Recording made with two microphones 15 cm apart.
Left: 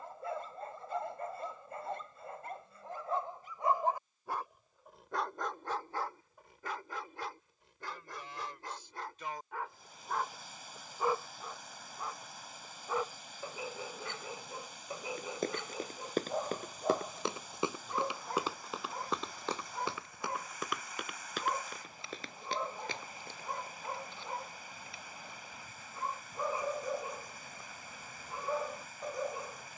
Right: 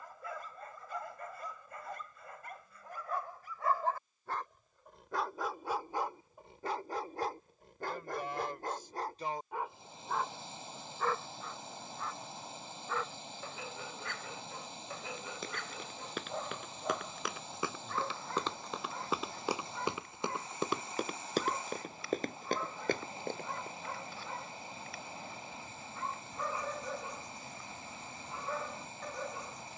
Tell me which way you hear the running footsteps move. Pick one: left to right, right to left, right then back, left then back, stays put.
left to right.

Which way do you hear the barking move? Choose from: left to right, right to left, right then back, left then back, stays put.
right then back.